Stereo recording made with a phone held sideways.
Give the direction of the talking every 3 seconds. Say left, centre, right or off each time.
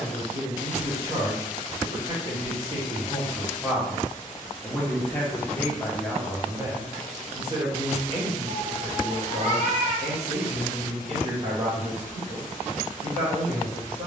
right, centre, right, right, right.